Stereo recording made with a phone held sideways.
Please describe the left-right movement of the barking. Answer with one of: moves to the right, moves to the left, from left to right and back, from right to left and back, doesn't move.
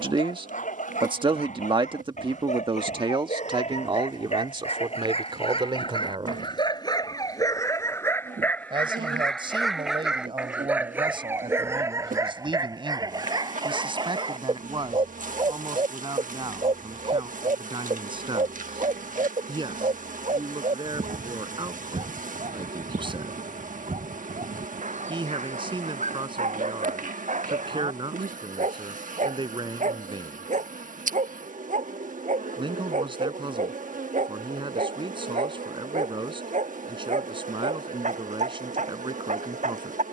moves to the right.